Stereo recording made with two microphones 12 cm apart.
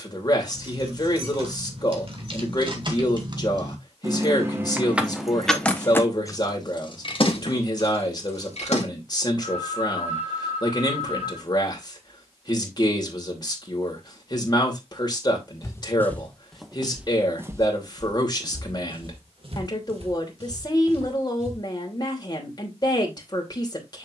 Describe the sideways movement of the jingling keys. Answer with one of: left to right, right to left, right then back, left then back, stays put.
right to left.